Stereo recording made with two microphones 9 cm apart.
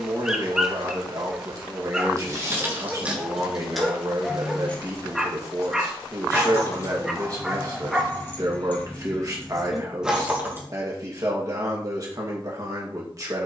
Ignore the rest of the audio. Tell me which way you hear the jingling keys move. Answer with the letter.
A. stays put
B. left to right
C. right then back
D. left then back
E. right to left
D.